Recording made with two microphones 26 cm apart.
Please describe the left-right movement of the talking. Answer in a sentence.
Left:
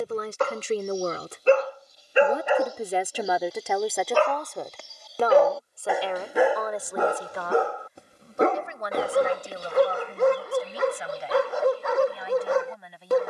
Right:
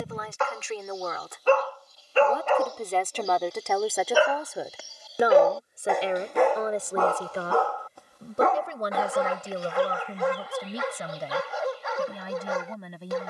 You can hear the talking go from the left side to the right.